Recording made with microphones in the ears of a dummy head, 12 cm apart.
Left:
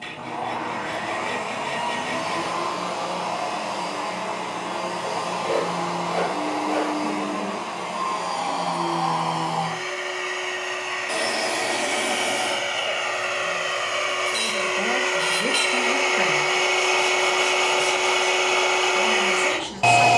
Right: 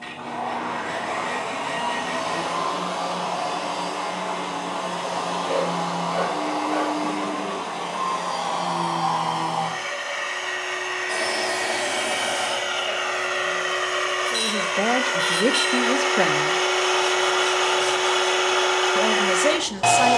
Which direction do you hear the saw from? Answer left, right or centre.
left.